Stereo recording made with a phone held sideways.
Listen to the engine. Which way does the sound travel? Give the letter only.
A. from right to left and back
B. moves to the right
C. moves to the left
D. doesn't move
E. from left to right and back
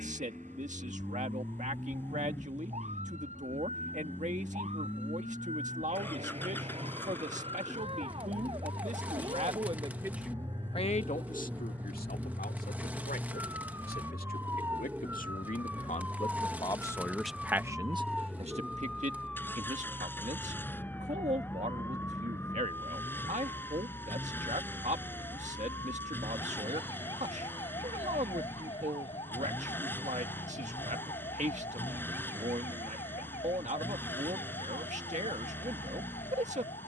D.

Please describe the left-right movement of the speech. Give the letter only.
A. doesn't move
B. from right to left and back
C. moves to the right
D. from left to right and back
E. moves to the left
B.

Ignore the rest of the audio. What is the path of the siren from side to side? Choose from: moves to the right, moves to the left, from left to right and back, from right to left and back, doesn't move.
moves to the left.